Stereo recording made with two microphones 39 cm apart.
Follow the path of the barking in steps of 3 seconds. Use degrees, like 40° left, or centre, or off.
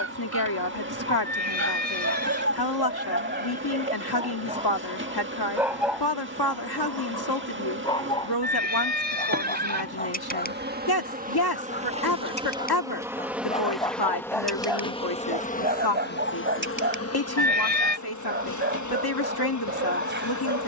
40° right, 20° right, 10° left, 20° left, 10° left, 30° right, 30° right.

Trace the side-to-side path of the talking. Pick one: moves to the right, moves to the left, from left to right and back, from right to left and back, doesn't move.
doesn't move.